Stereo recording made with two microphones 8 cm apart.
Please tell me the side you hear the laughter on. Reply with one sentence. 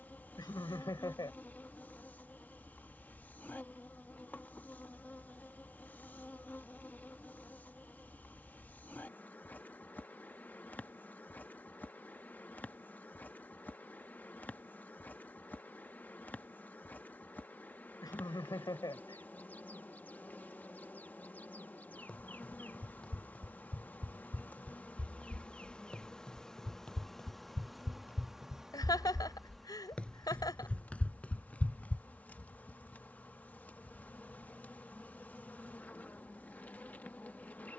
You can hear the laughter on the left.